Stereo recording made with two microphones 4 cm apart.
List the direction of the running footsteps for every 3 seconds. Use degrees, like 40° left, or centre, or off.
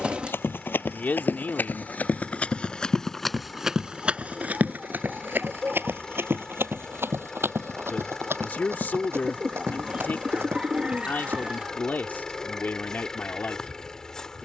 50° left, 30° right, 70° right, 80° right, off.